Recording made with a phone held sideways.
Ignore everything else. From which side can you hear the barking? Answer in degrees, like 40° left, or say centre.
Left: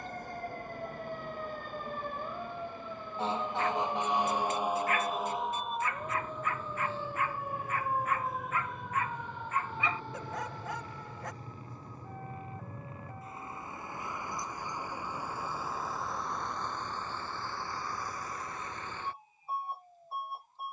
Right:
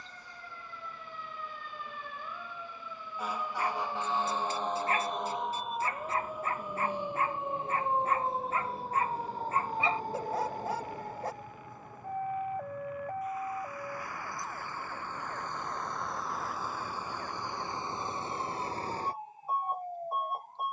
30° right.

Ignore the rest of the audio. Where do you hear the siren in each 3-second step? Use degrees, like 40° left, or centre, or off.
40° left, 10° left, 20° right, 40° right, 60° right, 60° right, 70° right.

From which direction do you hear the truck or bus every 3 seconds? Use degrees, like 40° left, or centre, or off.
60° left, 50° left, 50° left, 40° left, 30° left, centre, 40° right.